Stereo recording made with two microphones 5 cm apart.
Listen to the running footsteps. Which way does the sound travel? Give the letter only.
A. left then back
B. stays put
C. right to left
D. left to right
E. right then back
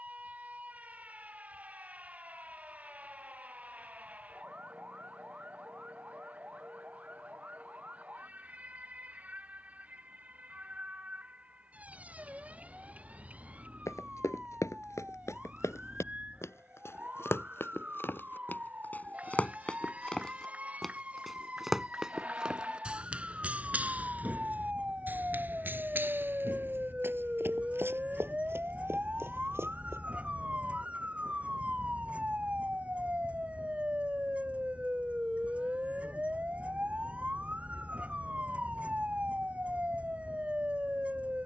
D.